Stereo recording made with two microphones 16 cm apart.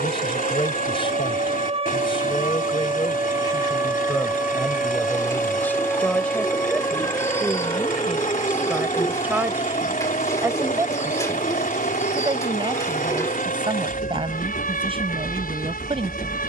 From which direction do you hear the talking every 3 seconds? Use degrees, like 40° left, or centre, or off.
30° left, 20° left, centre, 20° right, 30° right, 40° right.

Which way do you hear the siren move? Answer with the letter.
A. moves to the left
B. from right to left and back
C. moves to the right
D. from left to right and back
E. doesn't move
A.